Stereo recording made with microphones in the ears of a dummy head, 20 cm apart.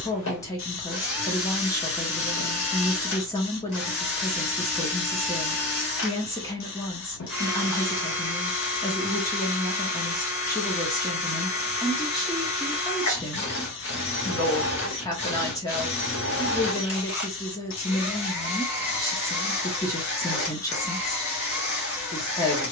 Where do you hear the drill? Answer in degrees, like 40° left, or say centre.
60° left.